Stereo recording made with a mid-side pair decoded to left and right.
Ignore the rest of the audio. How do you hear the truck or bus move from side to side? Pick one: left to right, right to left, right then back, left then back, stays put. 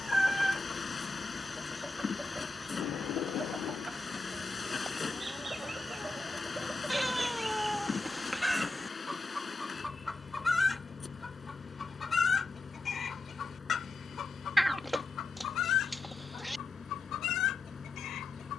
stays put.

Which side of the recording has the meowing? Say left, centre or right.
centre.